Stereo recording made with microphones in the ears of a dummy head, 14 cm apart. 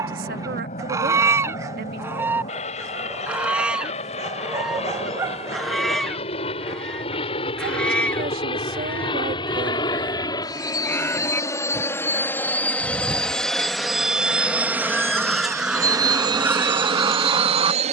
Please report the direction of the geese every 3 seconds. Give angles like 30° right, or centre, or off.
20° right, centre, 10° left, 10° left, 10° left, 10° right.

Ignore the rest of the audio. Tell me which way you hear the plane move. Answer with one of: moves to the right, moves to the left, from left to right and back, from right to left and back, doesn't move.
moves to the right.